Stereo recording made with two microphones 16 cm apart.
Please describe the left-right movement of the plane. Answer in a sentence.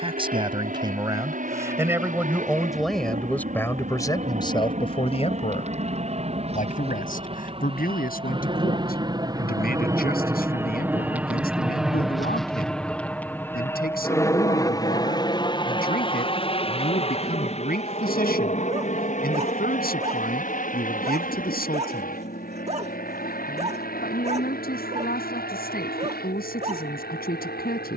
You can hear the plane move to the left.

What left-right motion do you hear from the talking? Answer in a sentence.
You can hear the talking go from the right side to the left.